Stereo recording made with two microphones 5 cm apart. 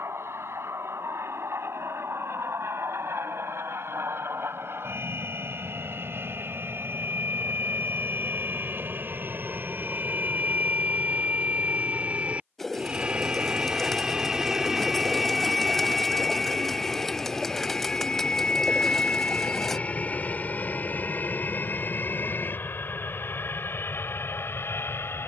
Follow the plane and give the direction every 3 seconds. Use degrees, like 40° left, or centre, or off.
70° right, 60° right, 50° right, 40° right, 20° right, 10° left, 30° left, 40° left, 50° left.